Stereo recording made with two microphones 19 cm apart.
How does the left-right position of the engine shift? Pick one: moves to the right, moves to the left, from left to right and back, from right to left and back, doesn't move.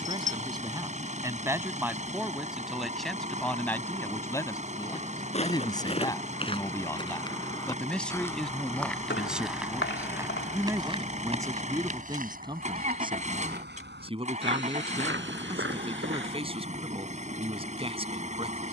doesn't move.